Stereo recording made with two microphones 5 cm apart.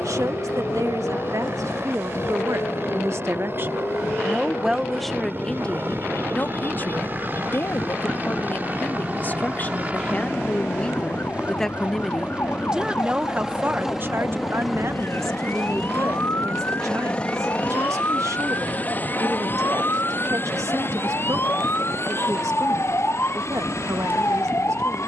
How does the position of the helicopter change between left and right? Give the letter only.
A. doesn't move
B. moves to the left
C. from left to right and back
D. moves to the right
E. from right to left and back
B.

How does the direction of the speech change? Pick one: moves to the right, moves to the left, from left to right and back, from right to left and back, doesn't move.
from right to left and back.